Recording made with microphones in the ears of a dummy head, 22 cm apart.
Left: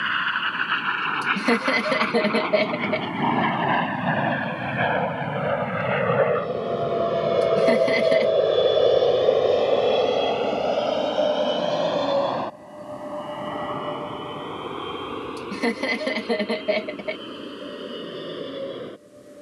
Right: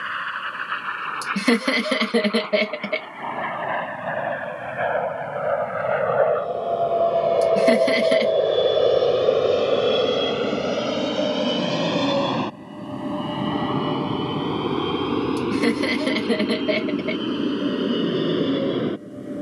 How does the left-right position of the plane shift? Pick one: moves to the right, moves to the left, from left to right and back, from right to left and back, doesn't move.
moves to the right.